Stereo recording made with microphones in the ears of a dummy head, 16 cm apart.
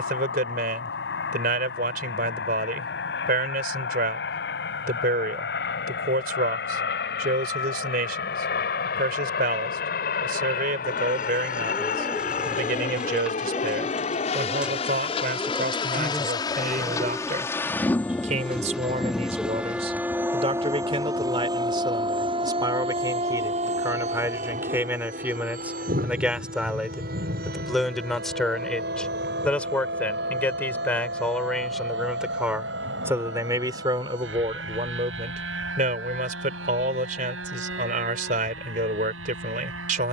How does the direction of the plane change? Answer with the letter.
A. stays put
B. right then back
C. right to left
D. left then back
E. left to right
E.